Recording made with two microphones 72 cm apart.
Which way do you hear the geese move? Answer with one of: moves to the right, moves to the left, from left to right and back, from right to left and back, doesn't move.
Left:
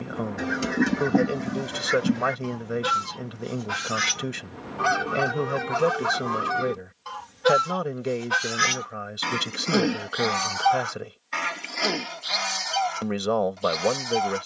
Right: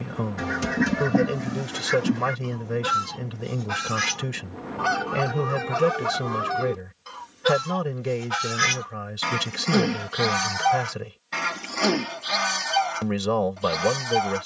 from right to left and back.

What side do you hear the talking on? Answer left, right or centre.
right.